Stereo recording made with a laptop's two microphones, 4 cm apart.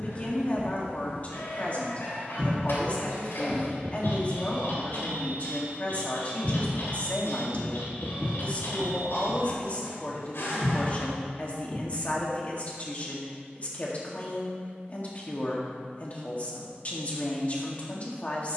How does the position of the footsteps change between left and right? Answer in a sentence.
You can hear the footsteps move from left to right and back again.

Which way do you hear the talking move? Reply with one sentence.
In this clip you hear the talking stay in one place.